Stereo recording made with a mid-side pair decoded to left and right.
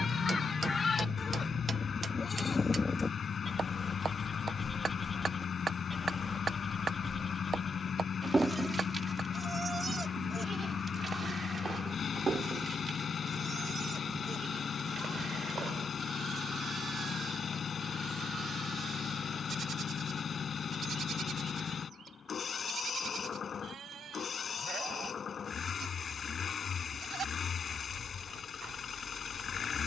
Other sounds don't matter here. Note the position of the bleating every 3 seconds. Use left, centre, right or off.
left, centre, right, right, right, right, right, right, right, right.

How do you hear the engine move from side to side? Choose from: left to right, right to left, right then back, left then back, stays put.
stays put.